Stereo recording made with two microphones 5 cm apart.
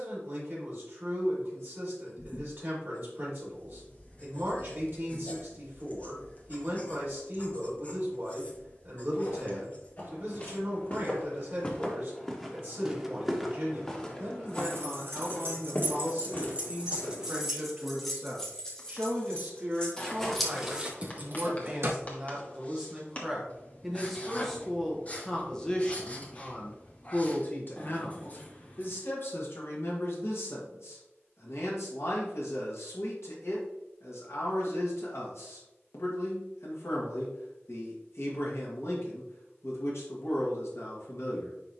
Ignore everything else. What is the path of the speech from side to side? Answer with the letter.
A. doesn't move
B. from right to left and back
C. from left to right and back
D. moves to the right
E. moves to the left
E.